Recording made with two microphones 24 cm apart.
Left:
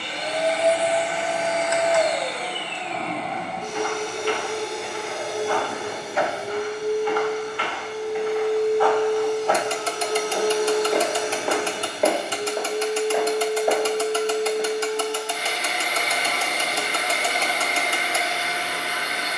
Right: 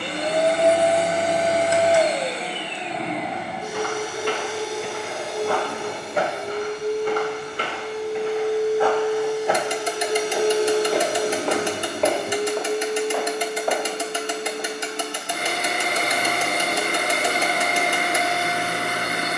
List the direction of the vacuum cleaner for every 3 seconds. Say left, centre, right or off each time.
right, centre, centre, right, right, right, right.